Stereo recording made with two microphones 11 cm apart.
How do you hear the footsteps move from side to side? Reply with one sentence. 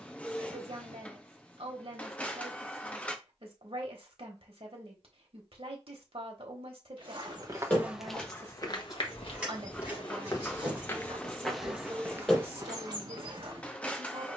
In this clip you hear the footsteps move from right to left and back again.